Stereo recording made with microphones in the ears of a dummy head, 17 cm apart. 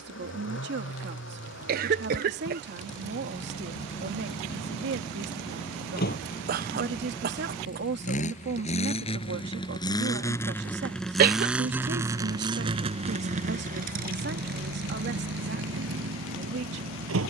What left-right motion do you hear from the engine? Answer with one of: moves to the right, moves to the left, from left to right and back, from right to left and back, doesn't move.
moves to the right.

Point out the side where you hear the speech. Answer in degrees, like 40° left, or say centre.
60° right.